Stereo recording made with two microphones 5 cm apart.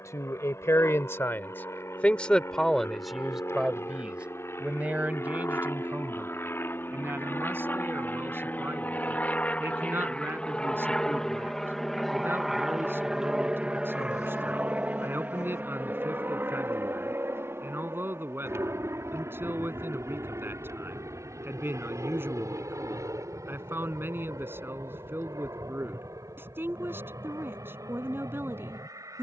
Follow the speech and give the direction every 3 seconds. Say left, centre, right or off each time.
left, right, right, right, right, right, right, right, right, right.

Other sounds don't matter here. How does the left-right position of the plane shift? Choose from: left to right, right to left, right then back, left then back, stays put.
left to right.